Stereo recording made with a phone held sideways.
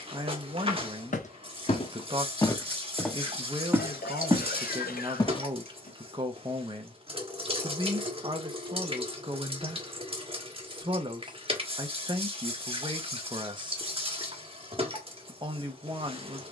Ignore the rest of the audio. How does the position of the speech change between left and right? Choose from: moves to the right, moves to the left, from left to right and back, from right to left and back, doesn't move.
doesn't move.